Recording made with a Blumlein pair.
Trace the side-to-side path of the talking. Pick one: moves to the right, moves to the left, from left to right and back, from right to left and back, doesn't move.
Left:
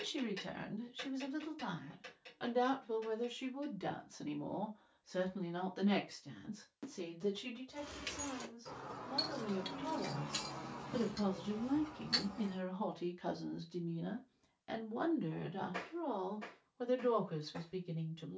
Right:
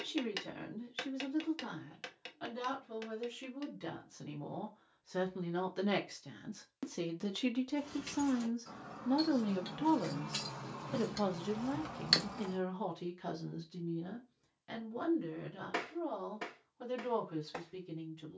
from left to right and back.